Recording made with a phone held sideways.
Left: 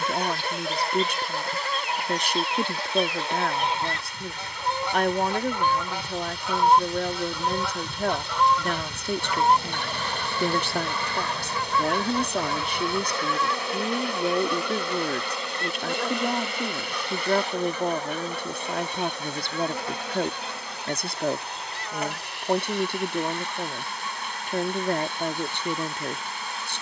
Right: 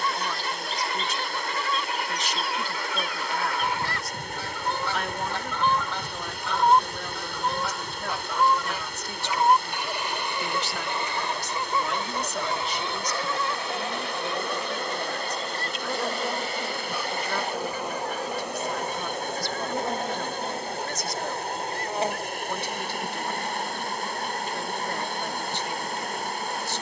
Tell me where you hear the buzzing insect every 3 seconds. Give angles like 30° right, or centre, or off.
40° right, 30° right, 10° left, 40° left, 20° left, centre, 20° right, 30° right, 40° right.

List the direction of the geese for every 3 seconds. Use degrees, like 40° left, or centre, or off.
40° left, 20° left, centre, 20° right, 30° right, 40° right, 40° right, 50° right, 50° right.